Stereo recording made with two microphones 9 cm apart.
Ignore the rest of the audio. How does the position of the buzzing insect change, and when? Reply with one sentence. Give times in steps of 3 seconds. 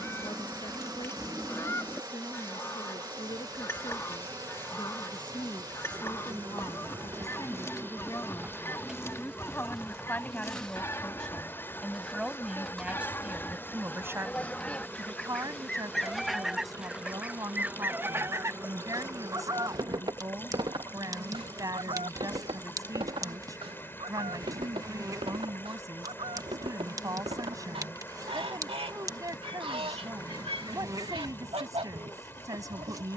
You can hear the buzzing insect on the right from 0 s, in the centre from 9 s and on the right from 18 s.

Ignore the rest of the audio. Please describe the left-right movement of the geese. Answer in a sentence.
In this clip you hear the geese move to the right.